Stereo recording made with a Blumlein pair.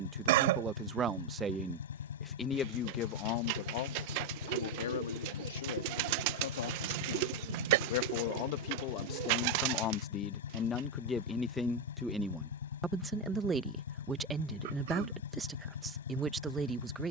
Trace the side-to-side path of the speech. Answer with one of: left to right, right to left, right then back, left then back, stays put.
left then back.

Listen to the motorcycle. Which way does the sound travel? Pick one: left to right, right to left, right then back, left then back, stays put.
stays put.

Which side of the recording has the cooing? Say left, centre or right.
right.